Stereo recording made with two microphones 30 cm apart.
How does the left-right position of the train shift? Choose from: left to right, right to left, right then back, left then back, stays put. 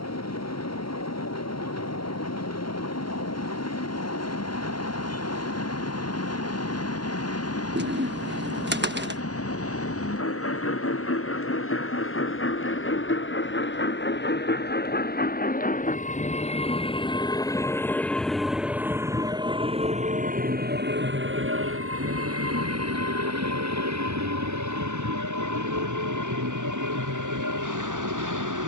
left to right.